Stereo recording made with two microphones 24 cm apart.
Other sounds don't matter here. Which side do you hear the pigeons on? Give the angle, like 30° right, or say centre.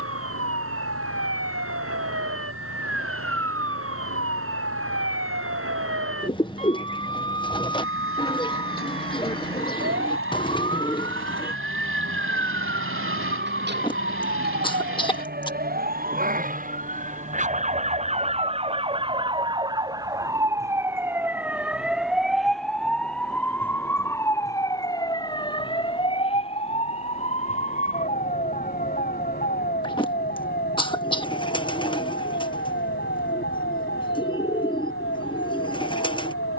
20° left.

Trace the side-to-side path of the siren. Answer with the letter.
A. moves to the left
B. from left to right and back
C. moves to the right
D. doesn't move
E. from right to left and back
A.